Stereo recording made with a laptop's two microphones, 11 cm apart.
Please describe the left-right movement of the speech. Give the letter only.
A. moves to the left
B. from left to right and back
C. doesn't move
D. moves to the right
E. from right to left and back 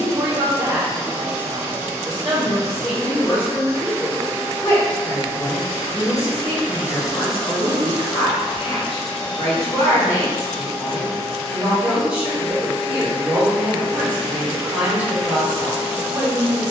E.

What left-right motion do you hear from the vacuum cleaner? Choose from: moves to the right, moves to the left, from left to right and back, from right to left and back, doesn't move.
from right to left and back.